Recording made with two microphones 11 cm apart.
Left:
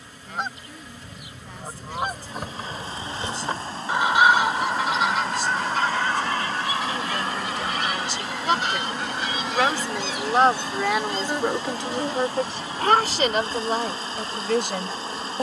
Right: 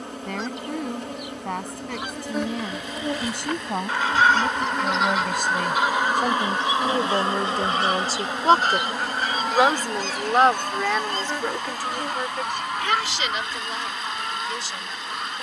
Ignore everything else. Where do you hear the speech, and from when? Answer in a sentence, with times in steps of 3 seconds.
In this clip you hear the speech on the right from 0 s, in the centre from 9 s and on the left from 12 s.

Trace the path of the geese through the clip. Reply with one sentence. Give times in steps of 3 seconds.
In this clip you hear the geese on the left from 0 s, in the centre from 3 s and on the right from 6 s.